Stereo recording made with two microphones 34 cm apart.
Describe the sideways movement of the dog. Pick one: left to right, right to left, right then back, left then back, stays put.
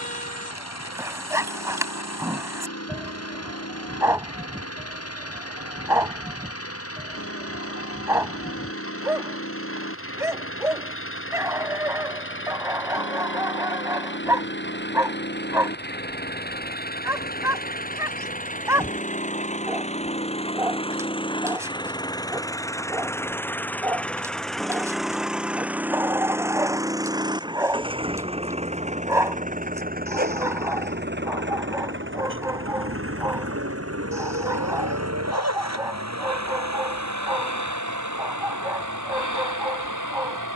stays put.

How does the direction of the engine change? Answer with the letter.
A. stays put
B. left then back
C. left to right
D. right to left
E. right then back
C.